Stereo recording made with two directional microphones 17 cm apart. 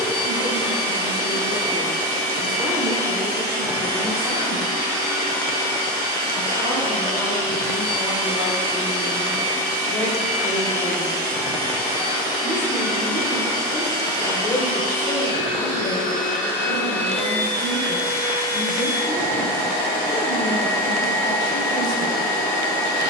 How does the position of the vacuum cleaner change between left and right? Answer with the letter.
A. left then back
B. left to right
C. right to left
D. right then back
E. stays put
E.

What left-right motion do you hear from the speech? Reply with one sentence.
You can hear the speech go from the right side to the left.